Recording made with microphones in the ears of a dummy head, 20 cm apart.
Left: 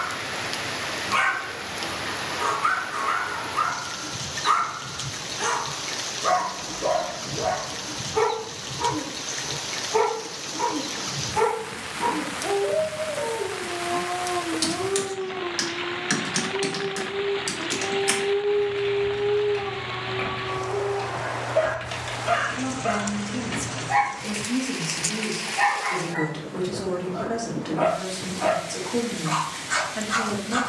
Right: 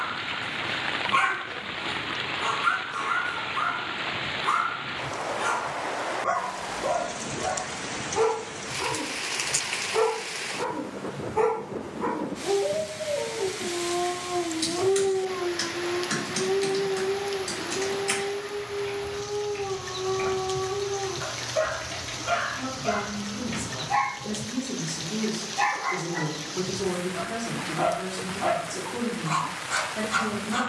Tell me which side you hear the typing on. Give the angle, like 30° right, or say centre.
60° left.